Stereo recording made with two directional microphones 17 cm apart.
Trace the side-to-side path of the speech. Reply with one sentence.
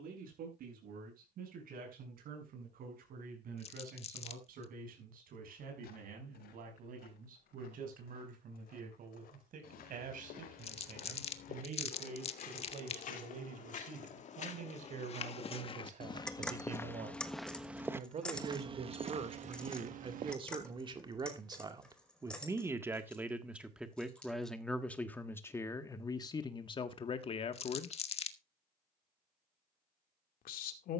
In this clip you hear the speech move to the left.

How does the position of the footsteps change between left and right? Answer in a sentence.
In this clip you hear the footsteps go from the left side to the right.